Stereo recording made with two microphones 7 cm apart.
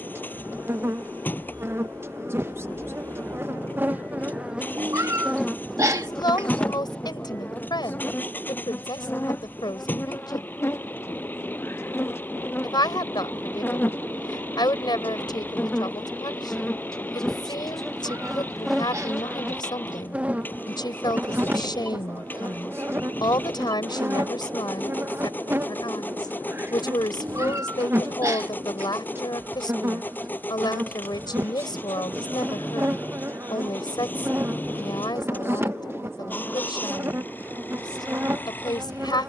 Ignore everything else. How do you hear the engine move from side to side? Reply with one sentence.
You can hear the engine stay put.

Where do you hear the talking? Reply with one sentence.
In this clip you hear the talking on the left.